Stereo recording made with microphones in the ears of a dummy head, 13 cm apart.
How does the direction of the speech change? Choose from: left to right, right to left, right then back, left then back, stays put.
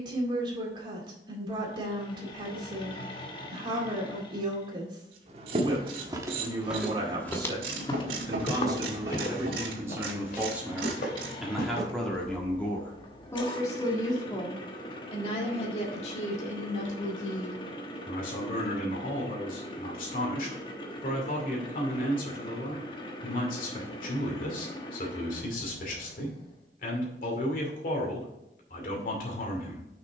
right to left.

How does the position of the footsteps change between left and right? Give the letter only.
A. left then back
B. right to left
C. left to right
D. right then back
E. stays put
B.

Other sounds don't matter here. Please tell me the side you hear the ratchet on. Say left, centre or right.
right.